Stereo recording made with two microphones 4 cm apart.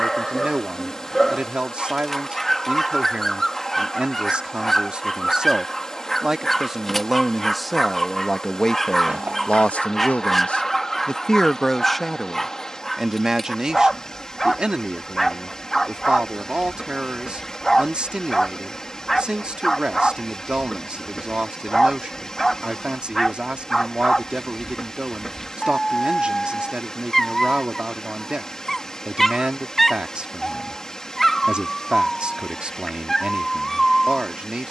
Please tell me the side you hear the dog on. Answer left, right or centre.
centre.